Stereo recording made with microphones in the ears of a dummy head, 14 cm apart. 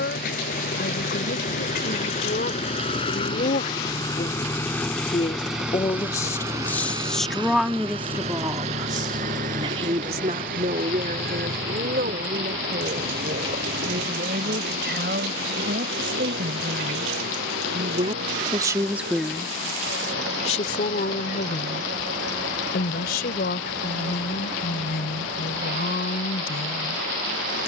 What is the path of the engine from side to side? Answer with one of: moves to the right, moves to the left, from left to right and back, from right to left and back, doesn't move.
moves to the right.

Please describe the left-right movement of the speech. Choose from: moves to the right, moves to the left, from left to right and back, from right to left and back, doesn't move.
from left to right and back.